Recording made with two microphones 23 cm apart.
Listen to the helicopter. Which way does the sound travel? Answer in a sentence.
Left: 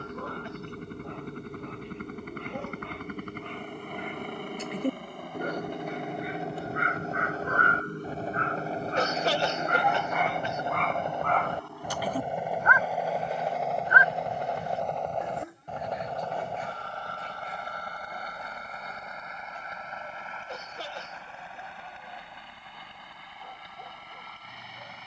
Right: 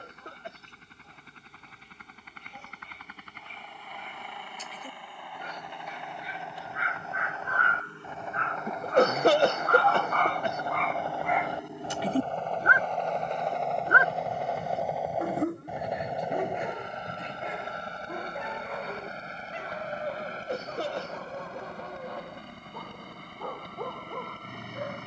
You can hear the helicopter move to the right.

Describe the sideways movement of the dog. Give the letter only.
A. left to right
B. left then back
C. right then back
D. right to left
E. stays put
A.